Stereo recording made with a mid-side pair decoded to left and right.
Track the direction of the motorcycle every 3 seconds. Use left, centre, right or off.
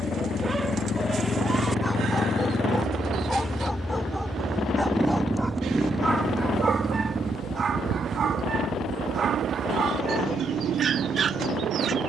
left, centre, right, right.